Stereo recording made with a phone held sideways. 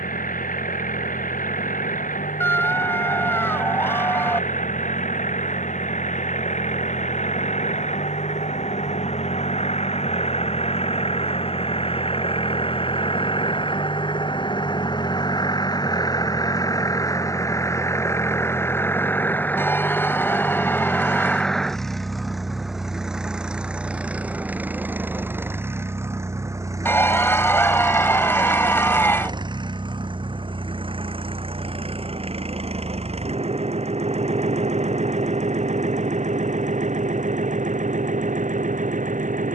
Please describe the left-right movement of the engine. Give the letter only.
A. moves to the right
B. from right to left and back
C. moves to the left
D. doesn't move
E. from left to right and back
A.